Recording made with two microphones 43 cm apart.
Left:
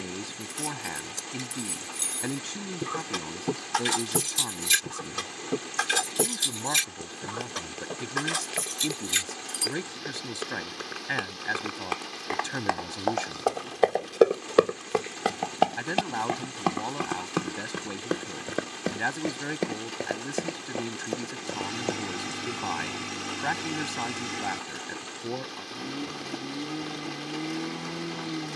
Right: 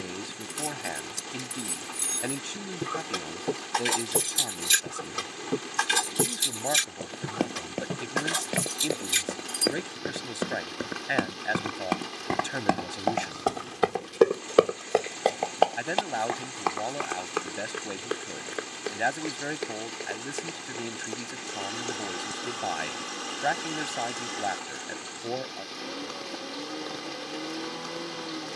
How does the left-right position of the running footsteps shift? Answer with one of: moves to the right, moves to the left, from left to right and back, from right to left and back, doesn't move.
moves to the left.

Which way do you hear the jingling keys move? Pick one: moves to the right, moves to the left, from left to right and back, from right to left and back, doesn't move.
from right to left and back.